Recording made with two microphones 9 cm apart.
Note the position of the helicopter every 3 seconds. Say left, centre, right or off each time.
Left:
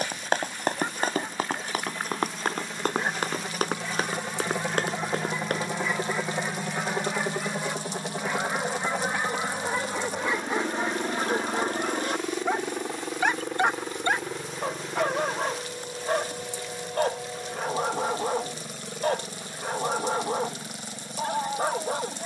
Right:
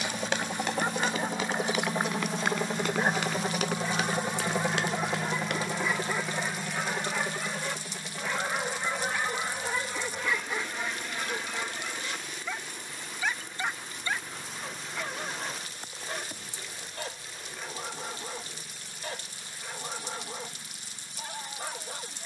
right, centre, left, left, left, left, left, left.